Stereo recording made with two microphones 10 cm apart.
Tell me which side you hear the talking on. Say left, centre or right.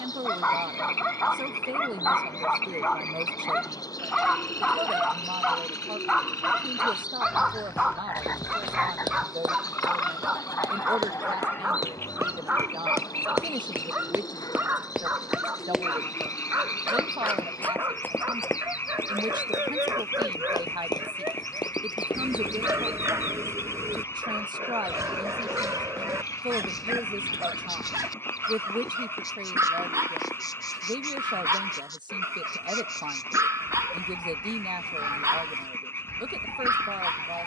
right.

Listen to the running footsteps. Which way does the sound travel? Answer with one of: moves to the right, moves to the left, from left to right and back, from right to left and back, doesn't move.
moves to the left.